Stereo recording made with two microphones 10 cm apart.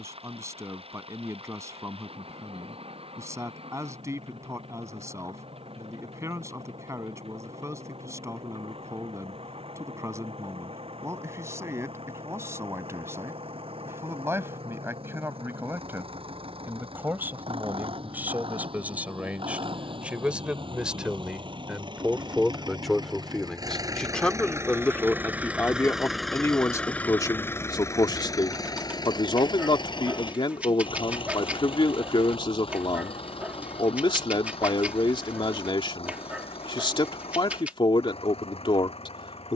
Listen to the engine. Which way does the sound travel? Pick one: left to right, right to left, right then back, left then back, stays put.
right to left.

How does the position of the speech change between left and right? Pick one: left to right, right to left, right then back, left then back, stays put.
right to left.